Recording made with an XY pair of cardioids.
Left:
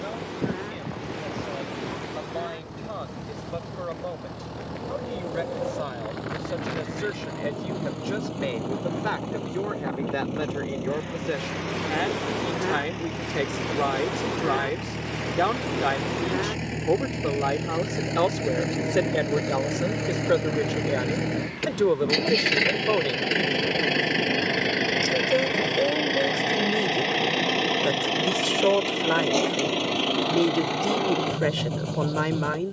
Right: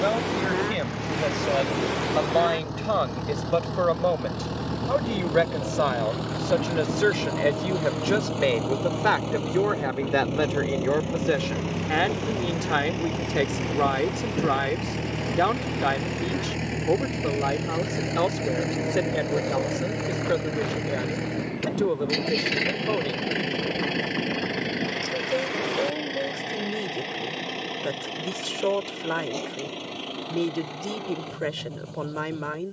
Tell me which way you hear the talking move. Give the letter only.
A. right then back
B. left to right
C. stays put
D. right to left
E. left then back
D.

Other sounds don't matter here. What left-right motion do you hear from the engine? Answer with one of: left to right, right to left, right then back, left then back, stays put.
right to left.